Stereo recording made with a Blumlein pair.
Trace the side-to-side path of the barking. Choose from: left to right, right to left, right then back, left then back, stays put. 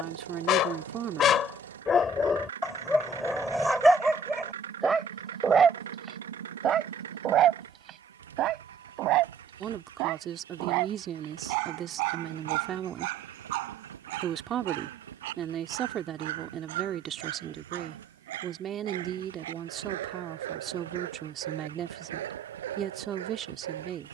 left to right.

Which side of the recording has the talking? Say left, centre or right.
right.